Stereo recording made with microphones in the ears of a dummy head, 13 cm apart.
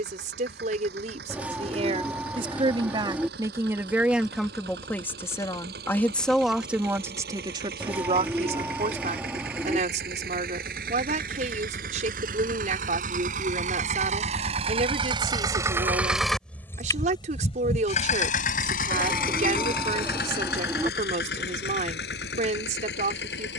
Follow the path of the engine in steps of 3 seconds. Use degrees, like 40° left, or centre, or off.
80° right, 80° right, 70° right, 70° right, 50° right, 10° left, 70° left, 80° left.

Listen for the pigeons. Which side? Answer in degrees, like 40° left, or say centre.
10° right.